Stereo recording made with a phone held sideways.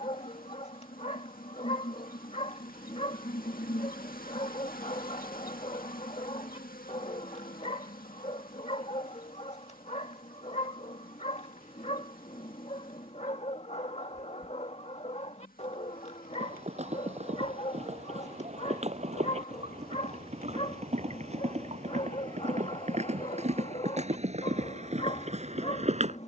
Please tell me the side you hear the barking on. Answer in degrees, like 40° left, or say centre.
40° left.